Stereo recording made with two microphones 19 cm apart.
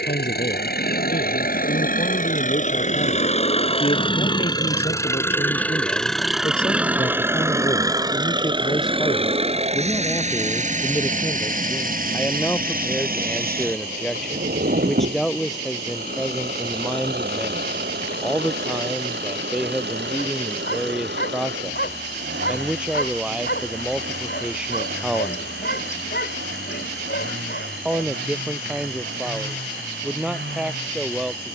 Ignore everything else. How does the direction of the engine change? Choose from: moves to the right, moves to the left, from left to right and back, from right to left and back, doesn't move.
moves to the right.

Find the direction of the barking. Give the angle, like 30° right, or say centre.
70° left.